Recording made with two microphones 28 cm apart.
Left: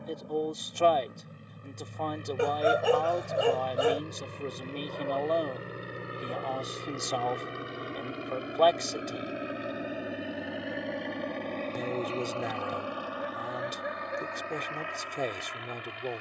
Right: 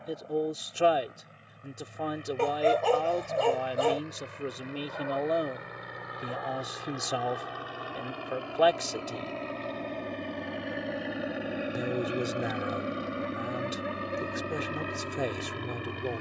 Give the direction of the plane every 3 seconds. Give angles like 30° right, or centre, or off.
50° left, 40° left, 30° left, centre, 30° right, 50° right.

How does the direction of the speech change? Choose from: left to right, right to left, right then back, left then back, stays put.
stays put.